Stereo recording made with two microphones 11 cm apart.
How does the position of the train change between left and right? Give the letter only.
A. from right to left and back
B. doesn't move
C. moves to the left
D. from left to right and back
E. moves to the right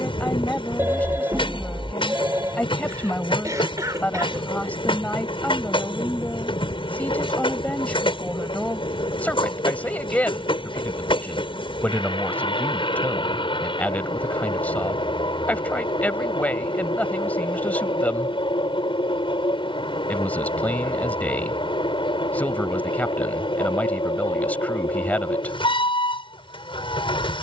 B.